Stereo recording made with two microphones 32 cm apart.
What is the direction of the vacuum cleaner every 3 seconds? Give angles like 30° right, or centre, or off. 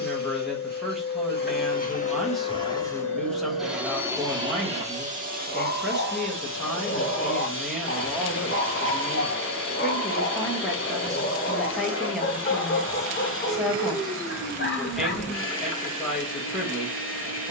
20° left, 10° right, 40° right, 40° right, 40° right, 40° right.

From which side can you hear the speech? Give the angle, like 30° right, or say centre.
centre.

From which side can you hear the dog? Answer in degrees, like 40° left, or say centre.
40° left.